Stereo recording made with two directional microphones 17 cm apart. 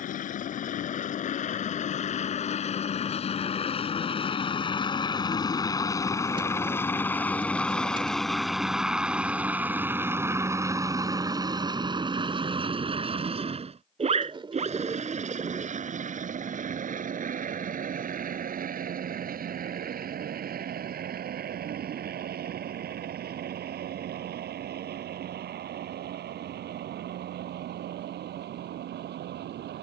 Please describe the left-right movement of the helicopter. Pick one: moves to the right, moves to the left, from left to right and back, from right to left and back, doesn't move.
moves to the right.